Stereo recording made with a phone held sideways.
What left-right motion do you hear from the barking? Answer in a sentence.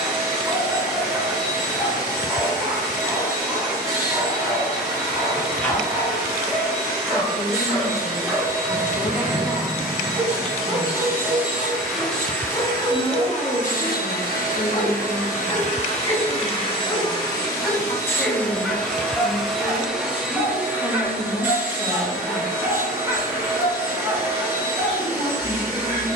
In this clip you hear the barking move from right to left and back again.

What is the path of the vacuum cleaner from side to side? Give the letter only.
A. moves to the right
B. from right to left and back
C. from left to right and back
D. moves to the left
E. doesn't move
B.